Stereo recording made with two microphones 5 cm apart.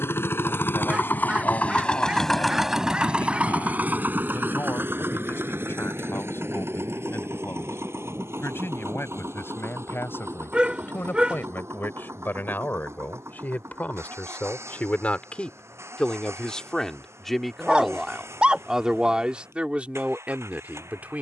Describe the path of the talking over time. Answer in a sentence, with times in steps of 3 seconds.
You can hear the talking on the left from 0 s, in the centre from 15 s and on the right from 18 s.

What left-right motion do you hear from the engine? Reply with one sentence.
In this clip you hear the engine move from left to right.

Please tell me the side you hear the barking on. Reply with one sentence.
You can hear the barking on the right.